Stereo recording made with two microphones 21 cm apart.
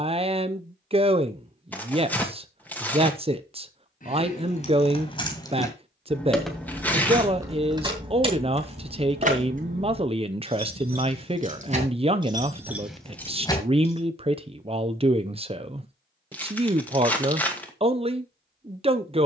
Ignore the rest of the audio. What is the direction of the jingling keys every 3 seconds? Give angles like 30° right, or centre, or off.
off, 30° left, 10° right, 40° right, centre, off, off.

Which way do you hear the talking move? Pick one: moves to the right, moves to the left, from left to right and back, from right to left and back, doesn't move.
doesn't move.